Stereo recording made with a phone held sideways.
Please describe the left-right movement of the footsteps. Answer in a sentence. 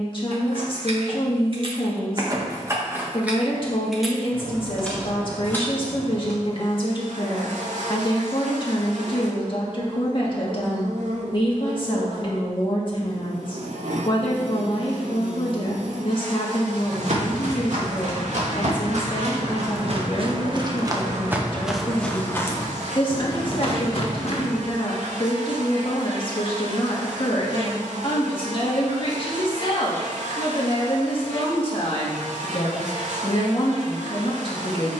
In this clip you hear the footsteps move to the left.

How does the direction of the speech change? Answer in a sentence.
You can hear the speech stay put.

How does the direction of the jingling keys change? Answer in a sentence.
In this clip you hear the jingling keys go from the right side to the left.